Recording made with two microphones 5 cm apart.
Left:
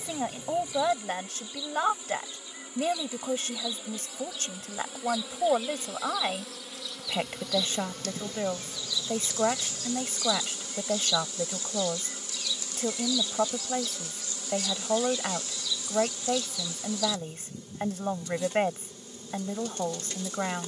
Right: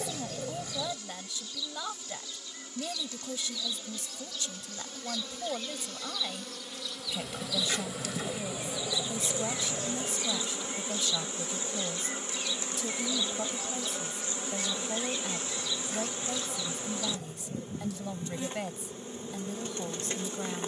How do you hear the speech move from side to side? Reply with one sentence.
You can hear the speech stay in one place.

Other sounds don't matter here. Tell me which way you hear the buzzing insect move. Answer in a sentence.
In this clip you hear the buzzing insect travel towards the right.